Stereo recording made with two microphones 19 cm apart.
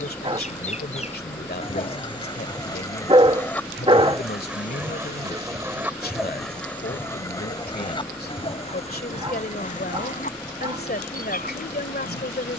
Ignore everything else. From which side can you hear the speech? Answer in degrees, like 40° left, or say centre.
50° left.